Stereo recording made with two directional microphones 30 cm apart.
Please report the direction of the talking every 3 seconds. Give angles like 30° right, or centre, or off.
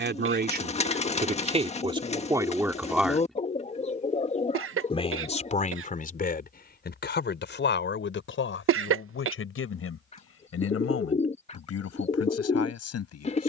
20° right, 20° left, 40° left, 50° left, 50° left.